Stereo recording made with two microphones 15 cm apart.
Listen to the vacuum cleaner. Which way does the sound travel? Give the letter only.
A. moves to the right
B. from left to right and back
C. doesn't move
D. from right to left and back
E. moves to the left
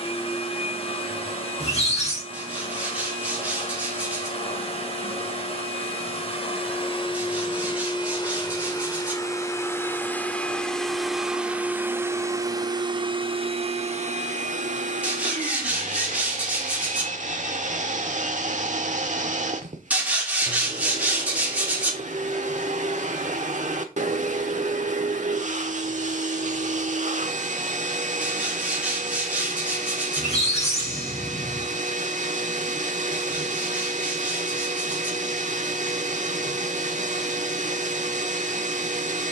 A.